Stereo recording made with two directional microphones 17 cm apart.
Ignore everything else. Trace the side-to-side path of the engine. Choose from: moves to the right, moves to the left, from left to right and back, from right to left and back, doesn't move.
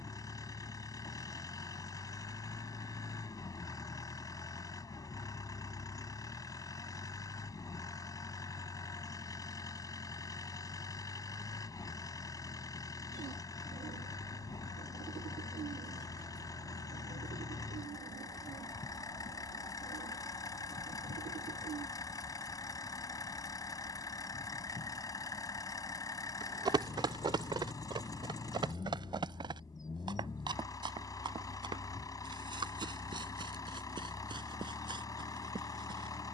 doesn't move.